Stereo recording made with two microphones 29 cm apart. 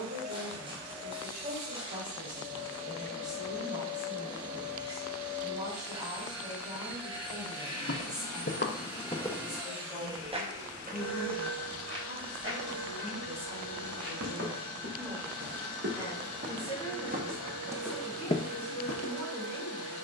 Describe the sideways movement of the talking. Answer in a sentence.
In this clip you hear the talking move from right to left.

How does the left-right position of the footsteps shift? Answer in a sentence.
You can hear the footsteps move from left to right and back again.